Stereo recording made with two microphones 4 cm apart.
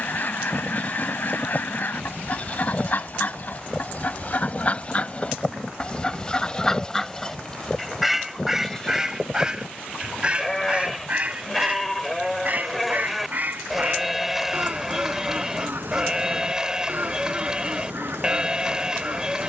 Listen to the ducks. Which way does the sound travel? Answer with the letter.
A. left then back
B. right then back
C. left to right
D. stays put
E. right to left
C.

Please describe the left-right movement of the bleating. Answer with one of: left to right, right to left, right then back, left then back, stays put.
left to right.